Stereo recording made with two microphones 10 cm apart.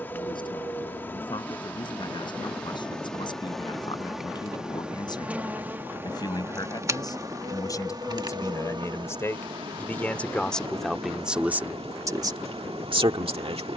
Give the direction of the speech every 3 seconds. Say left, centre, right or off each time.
left, left, left, centre, right.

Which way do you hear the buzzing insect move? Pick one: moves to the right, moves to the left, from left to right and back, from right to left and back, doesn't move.
moves to the right.